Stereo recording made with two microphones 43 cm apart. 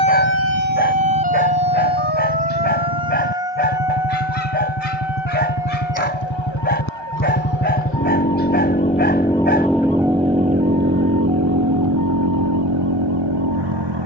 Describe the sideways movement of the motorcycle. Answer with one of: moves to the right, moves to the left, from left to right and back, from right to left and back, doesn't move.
moves to the right.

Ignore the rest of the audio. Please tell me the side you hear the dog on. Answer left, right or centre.
left.